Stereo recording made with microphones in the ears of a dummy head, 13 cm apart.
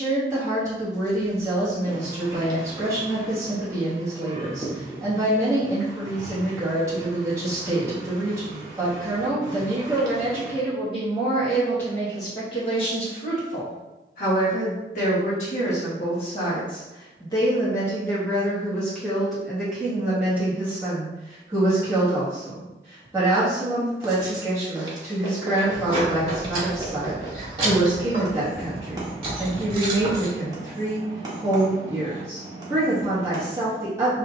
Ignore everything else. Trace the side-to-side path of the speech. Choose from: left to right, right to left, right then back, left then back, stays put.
left then back.